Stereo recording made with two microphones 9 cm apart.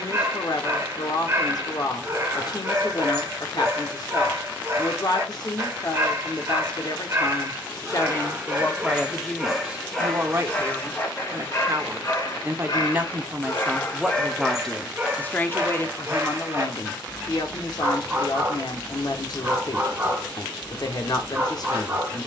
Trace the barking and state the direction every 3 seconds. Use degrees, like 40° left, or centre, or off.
30° right, 30° right, 20° right, 20° left, 30° left, 20° right, 30° right, 30° right.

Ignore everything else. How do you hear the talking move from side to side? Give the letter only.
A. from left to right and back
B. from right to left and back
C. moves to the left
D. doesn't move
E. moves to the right
A.